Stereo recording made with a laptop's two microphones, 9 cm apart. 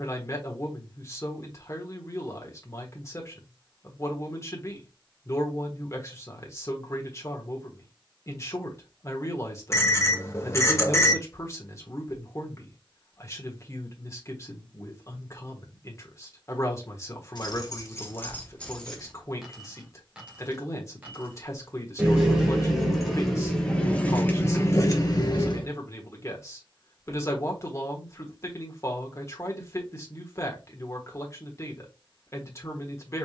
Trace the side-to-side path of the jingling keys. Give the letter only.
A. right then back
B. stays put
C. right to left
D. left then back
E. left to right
A.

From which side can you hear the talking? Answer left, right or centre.
left.